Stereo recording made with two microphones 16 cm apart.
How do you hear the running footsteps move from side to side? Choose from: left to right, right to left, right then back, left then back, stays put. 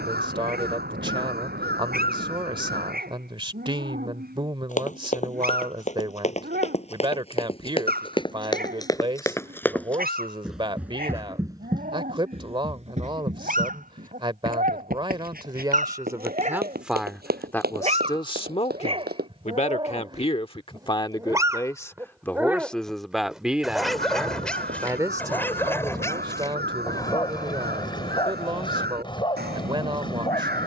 left to right.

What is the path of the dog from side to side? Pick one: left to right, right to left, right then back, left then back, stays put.
right to left.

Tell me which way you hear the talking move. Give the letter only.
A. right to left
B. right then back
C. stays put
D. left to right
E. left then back
E.